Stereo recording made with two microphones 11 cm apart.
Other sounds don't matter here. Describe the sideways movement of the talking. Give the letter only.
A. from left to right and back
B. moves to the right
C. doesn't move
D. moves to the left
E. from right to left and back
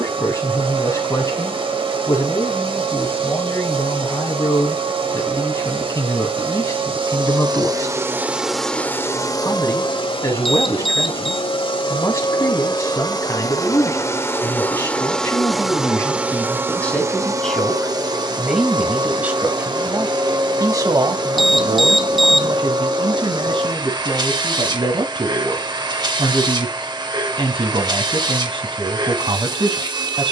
B.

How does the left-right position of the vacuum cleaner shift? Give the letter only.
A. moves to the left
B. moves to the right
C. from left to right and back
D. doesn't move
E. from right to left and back
E.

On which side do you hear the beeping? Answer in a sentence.
In this clip you hear the beeping in the centre.